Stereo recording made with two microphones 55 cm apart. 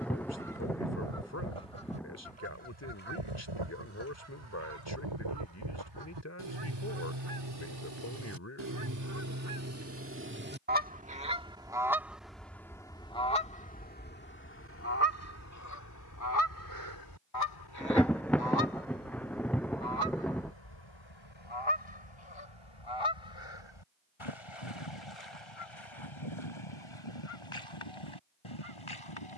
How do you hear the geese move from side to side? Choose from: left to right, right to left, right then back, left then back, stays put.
right to left.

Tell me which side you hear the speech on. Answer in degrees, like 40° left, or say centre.
30° left.